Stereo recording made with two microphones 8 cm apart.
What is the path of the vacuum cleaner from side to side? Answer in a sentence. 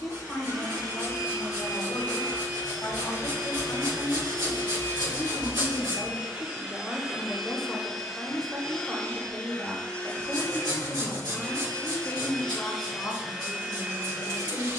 You can hear the vacuum cleaner move from right to left and back again.